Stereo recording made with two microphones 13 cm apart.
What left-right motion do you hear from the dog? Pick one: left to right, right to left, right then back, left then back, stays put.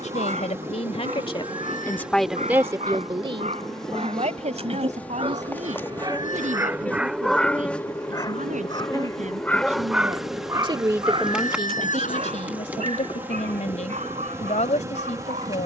left then back.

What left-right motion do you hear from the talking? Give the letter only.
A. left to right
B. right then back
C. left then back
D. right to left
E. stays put
B.